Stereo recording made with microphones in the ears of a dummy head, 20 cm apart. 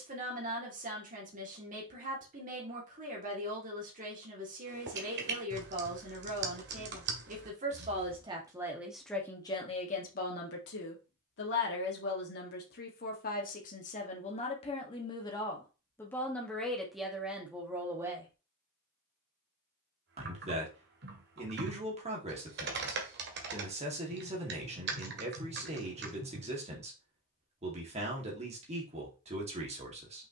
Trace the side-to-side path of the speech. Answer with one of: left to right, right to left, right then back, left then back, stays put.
left then back.